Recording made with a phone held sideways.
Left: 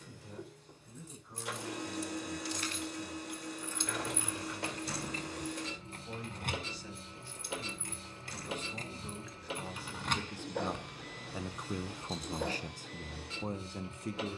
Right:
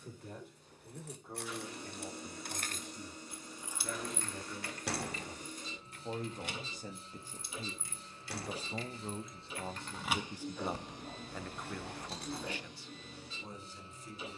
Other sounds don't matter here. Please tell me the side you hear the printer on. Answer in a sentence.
In this clip you hear the printer on the left.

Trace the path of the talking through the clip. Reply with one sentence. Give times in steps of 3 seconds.
You can hear the talking on the right from 0 s, in the centre from 9 s and on the left from 12 s.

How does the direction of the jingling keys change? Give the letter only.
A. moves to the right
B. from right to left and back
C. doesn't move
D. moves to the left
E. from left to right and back
B.